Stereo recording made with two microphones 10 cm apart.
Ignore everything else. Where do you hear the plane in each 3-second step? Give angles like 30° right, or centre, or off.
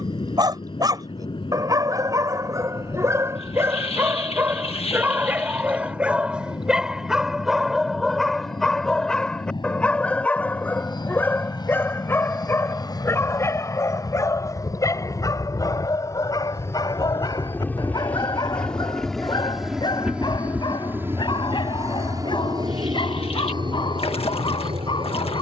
60° left, 60° left, 60° left, 50° left, 40° left, 30° left, centre, 40° right, 60° right.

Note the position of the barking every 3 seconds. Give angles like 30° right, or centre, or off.
40° right, 20° right, centre, 10° left, 30° left, 40° left, 50° left, 50° left, 50° left.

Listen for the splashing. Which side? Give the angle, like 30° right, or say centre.
80° left.